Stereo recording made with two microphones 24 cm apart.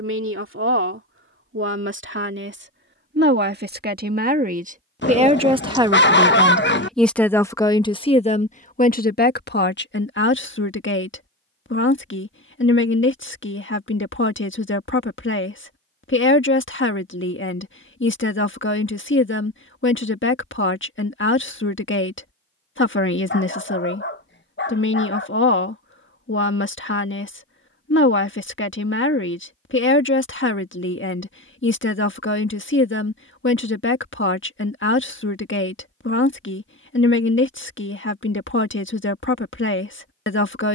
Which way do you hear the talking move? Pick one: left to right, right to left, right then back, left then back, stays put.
right to left.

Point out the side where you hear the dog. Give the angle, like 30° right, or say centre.
50° left.